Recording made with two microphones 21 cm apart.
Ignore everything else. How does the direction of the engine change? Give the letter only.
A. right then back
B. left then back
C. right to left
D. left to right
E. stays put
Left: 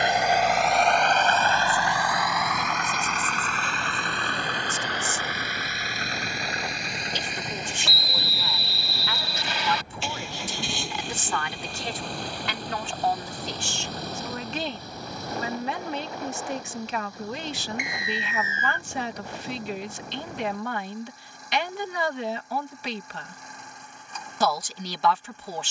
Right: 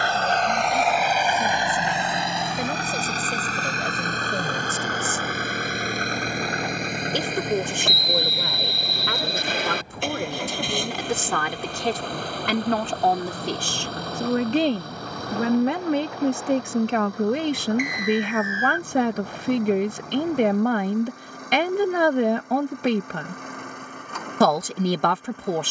D.